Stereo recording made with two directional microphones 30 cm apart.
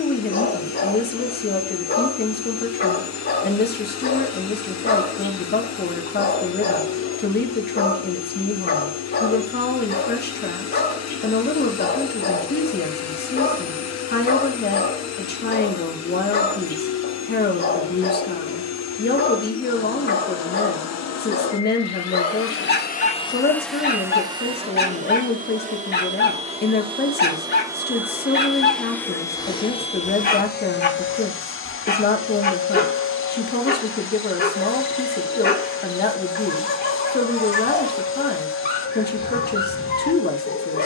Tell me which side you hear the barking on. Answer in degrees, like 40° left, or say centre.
30° left.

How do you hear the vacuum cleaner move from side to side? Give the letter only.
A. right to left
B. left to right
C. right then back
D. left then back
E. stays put
C.